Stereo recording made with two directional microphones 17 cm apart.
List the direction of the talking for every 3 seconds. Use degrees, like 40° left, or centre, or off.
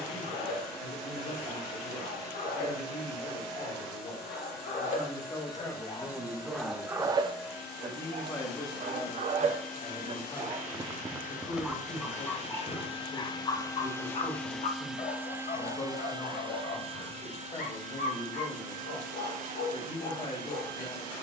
40° left, 30° left, 10° left, 30° left, 40° left, 40° left, 40° left.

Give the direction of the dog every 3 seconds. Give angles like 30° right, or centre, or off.
60° left, 50° left, 30° right, 20° right, 30° left, 50° left, 60° left.